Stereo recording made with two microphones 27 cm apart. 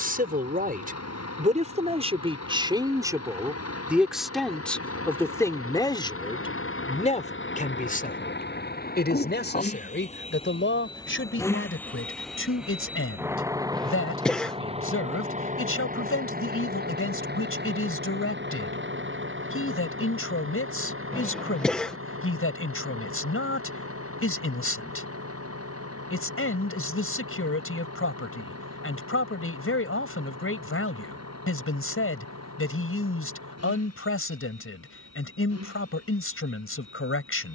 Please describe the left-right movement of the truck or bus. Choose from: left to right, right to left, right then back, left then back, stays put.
left to right.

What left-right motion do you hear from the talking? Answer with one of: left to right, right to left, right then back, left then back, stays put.
right to left.